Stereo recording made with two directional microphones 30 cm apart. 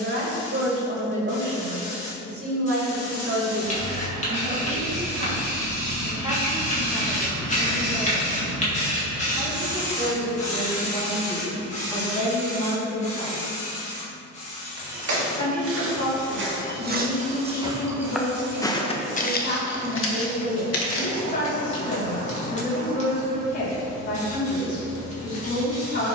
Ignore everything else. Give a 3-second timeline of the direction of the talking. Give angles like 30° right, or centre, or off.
40° right, 30° right, 10° right, 10° left, 20° left, 30° left, 30° left, 30° left, 30° left.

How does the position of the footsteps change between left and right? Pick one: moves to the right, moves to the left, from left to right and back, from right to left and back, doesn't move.
moves to the left.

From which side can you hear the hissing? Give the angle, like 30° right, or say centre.
20° left.